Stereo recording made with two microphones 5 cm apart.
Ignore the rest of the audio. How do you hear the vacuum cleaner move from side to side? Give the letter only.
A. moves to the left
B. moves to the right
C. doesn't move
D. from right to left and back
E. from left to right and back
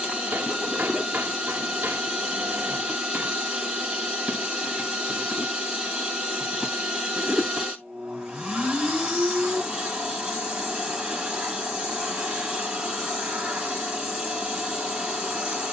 C.